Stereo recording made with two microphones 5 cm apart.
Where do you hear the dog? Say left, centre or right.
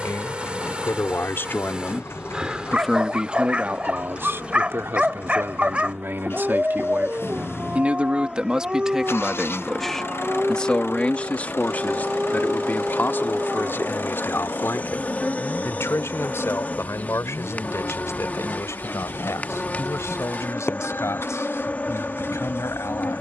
right.